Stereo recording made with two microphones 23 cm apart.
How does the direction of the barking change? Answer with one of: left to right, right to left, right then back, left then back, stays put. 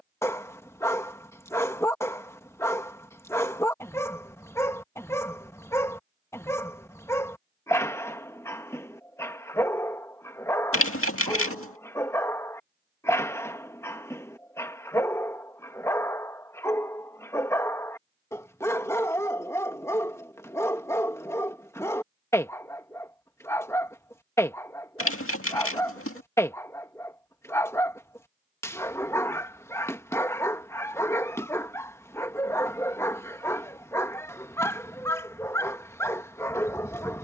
stays put.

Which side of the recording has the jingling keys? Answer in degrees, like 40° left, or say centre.
70° left.